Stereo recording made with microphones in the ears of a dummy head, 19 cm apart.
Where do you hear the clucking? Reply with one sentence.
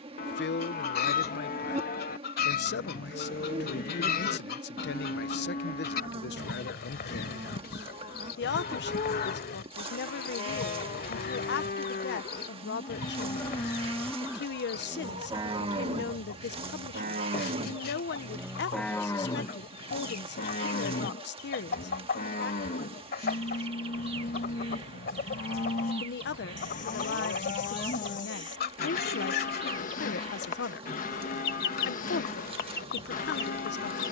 You can hear the clucking on the left.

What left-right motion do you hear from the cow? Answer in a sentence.
In this clip you hear the cow go right and come back.